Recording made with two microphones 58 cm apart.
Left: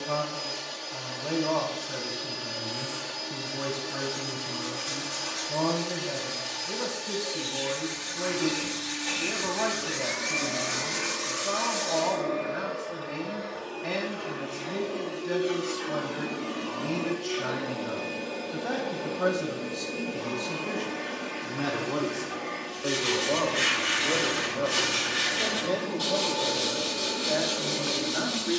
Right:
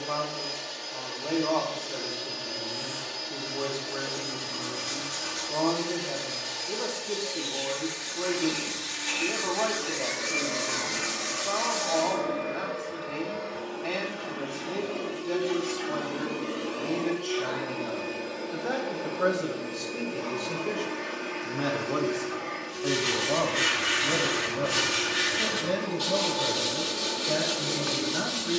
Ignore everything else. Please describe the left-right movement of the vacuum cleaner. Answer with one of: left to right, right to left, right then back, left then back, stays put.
right then back.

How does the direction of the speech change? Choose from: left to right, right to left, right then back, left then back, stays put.
left to right.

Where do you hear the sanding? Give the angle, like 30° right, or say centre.
50° right.